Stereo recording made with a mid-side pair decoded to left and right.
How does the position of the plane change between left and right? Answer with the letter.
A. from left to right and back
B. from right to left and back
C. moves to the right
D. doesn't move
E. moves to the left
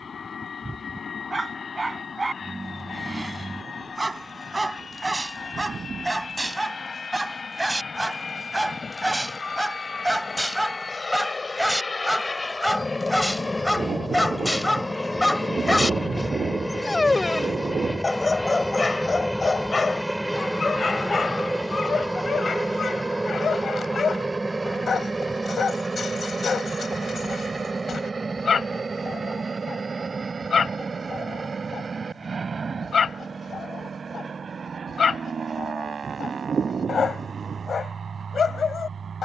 C.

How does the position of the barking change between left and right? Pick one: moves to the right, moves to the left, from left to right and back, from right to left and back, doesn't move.
moves to the left.